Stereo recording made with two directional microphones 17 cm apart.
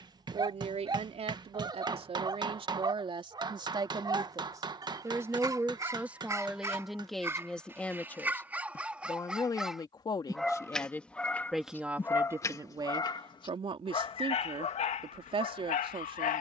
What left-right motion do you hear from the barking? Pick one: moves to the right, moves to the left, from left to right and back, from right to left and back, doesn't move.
moves to the left.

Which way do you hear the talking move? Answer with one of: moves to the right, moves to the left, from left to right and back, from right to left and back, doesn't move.
from right to left and back.